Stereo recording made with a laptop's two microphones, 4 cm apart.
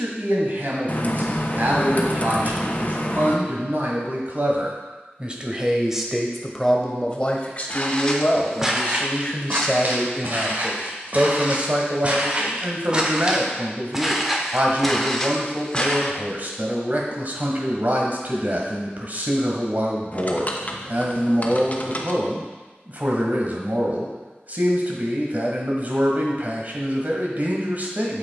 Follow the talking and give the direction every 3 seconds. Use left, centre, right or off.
right, right, left, centre, right, right, right, right, right, right.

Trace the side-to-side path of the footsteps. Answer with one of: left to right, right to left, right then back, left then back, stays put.
right then back.